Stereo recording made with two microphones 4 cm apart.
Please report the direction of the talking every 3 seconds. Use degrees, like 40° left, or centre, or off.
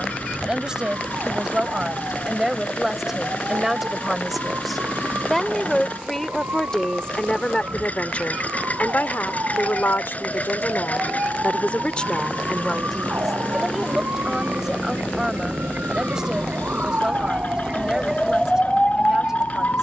20° right, centre, 30° left, 50° left, centre, 20° right, 20° right.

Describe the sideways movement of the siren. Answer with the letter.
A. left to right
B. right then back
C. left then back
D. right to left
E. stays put
D.